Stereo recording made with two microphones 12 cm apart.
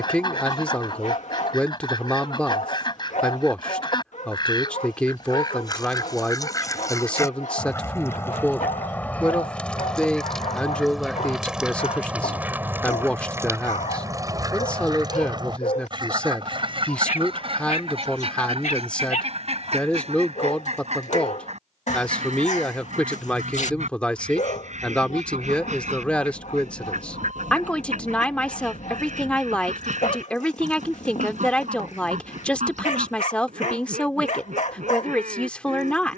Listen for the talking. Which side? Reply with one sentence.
You can hear the talking in the centre.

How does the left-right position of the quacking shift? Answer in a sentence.
You can hear the quacking move to the right.